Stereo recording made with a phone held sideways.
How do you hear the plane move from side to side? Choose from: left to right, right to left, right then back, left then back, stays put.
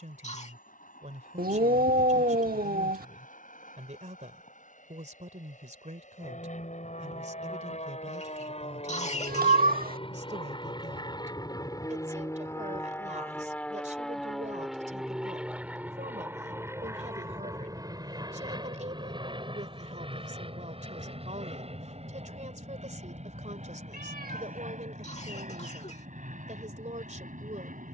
left to right.